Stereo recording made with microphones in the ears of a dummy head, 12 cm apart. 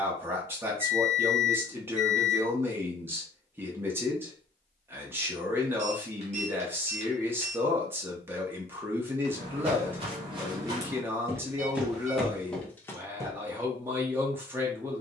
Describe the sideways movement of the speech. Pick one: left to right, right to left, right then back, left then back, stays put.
stays put.